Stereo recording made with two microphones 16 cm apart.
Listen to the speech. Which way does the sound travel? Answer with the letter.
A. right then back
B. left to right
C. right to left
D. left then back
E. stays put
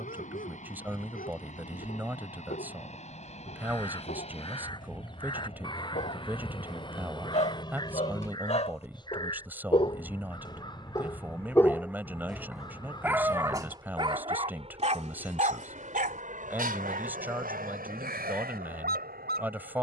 E.